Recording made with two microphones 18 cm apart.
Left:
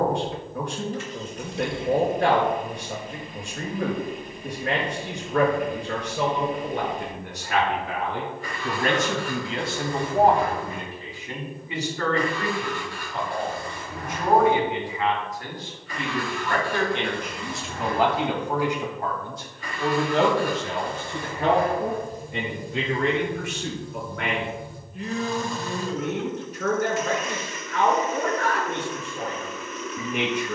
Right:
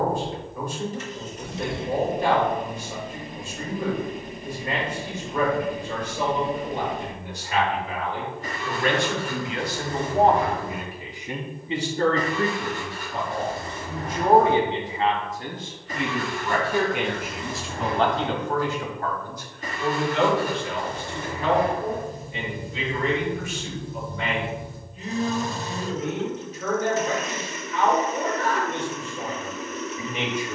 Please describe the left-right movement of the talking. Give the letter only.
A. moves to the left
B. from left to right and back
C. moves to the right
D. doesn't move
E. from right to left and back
B.